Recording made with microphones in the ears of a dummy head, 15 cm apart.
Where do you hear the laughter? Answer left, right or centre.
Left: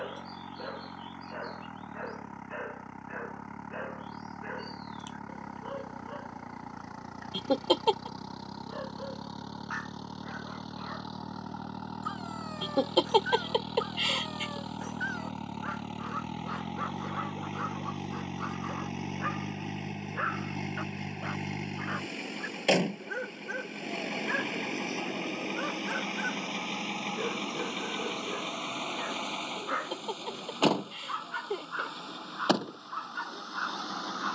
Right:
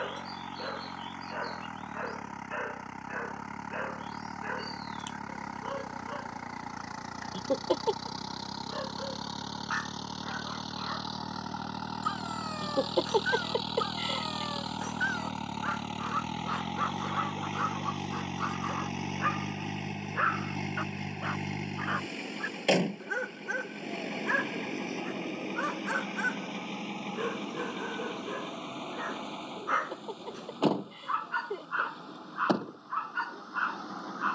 left.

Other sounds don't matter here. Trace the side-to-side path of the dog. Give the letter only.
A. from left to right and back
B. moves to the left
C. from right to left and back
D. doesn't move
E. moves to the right
D.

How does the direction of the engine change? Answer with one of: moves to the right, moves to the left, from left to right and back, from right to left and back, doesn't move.
moves to the left.